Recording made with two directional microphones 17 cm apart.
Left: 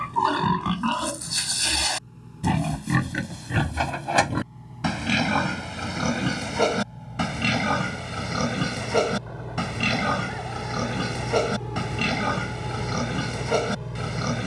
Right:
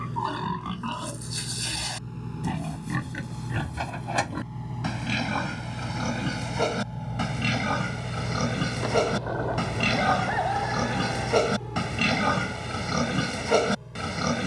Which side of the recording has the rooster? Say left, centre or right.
right.